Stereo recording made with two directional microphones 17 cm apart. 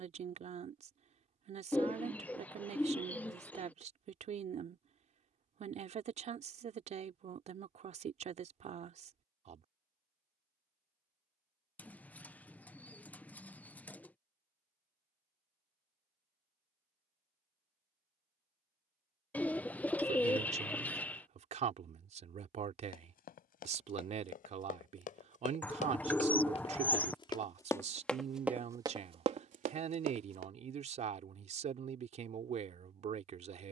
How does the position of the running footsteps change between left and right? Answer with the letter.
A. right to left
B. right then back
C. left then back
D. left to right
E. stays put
D.